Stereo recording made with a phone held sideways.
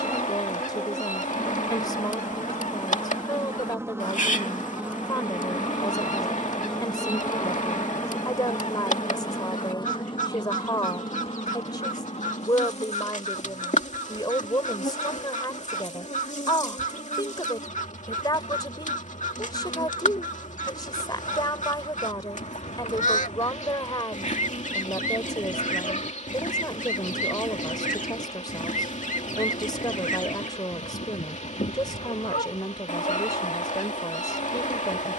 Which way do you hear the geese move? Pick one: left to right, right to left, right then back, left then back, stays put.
stays put.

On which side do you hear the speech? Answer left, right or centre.
left.